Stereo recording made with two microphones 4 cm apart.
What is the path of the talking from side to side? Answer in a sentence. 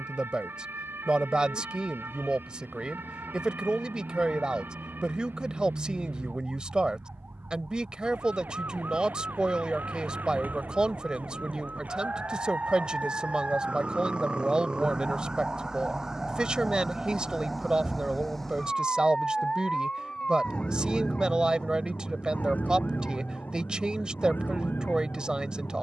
In this clip you hear the talking stay put.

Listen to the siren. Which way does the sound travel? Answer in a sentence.
In this clip you hear the siren move to the left.